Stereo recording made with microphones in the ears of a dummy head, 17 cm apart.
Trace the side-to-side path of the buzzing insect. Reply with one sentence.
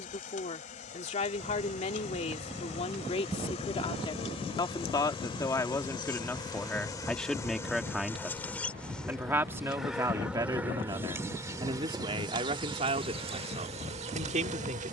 In this clip you hear the buzzing insect move from left to right.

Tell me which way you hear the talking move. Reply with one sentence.
You can hear the talking move to the right.